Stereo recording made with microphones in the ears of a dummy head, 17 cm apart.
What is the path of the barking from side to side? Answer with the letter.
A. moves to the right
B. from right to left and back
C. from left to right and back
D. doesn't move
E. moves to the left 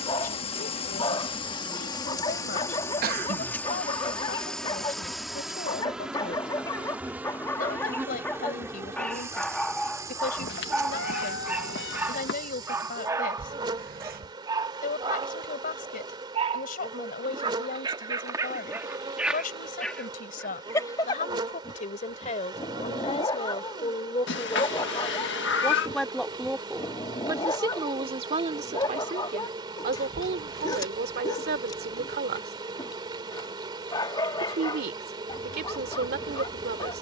C.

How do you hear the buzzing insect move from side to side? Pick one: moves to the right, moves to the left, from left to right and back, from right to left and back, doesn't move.
moves to the right.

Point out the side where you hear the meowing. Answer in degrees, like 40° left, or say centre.
70° left.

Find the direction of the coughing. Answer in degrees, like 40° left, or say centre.
50° right.